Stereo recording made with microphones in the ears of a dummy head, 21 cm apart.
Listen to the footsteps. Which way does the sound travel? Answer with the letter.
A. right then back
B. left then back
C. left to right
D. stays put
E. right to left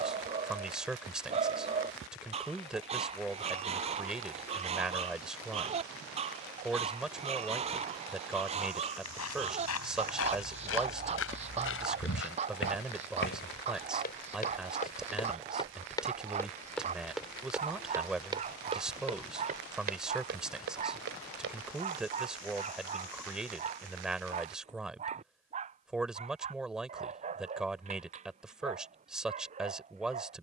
C.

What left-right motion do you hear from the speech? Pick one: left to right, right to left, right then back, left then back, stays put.
stays put.